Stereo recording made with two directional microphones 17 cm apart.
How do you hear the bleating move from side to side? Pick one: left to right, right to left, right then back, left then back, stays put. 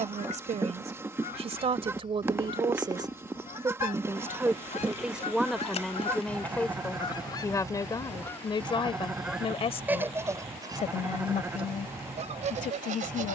stays put.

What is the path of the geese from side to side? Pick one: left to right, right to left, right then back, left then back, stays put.
left to right.